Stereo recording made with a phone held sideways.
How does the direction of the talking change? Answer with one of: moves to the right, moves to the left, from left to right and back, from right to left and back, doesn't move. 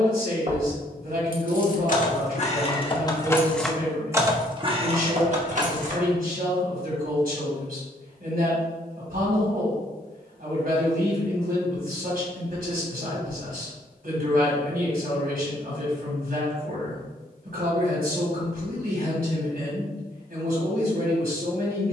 doesn't move.